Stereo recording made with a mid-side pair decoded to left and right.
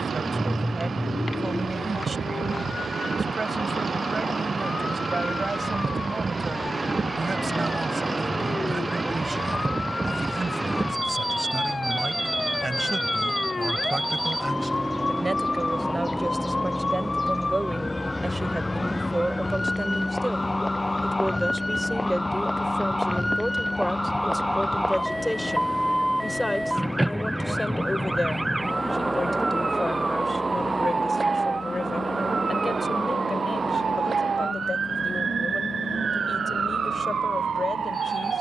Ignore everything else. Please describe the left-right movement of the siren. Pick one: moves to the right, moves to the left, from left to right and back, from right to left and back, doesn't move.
moves to the right.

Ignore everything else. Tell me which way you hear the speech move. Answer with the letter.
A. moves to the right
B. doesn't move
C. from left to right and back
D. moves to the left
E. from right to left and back
D.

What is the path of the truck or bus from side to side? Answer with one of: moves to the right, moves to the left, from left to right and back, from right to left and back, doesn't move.
moves to the left.